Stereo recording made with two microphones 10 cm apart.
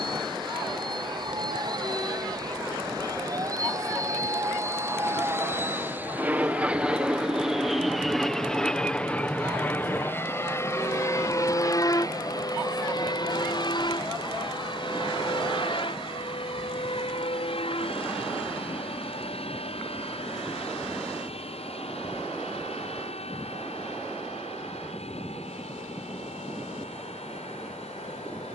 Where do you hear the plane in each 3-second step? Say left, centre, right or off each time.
right, right, centre, left, left, left, left, left, left, left.